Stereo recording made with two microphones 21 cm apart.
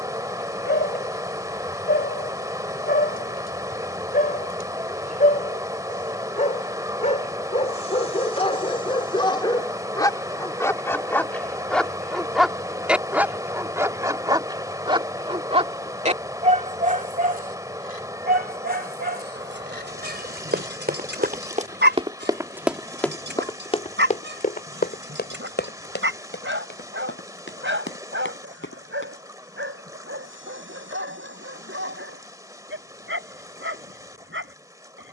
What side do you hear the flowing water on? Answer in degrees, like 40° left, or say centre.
20° right.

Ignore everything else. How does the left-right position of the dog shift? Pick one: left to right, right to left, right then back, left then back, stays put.
left to right.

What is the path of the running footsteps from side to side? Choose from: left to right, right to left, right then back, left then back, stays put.
right to left.